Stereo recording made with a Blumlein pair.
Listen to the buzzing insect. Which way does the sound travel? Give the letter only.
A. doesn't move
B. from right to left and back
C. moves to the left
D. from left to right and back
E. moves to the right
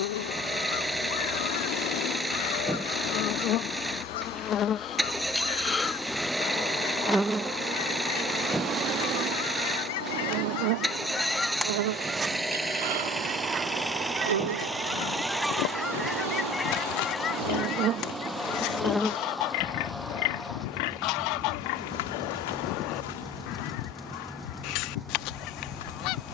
D.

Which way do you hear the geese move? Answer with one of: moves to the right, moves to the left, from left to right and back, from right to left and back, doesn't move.
from left to right and back.